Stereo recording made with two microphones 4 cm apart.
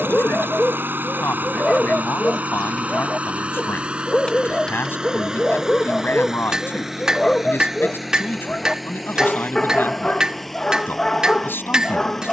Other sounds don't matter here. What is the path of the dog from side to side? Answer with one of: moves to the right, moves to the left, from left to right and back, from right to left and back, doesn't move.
doesn't move.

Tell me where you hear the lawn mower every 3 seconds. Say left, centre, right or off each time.
right, right, centre, centre.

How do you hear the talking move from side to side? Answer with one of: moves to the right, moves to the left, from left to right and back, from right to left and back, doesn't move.
doesn't move.